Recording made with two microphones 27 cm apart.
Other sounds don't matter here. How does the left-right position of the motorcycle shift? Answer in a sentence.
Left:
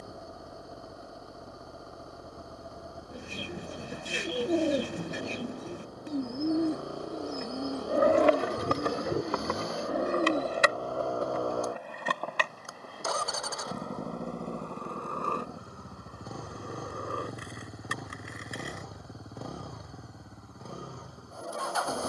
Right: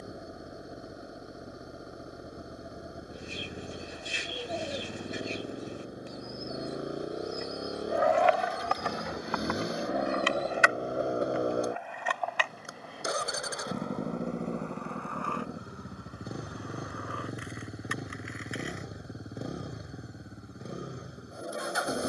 In this clip you hear the motorcycle stay put.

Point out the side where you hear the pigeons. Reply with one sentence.
You can hear the pigeons on the left.